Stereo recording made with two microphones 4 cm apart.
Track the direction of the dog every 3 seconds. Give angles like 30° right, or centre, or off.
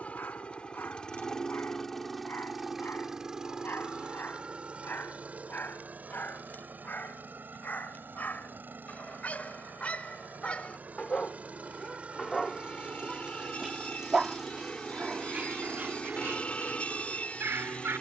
60° left, 50° left, 50° left, 30° left, centre, 50° right.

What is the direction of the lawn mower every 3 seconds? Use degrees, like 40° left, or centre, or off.
10° left, 30° right, 50° right, 40° right, 20° right, 20° left.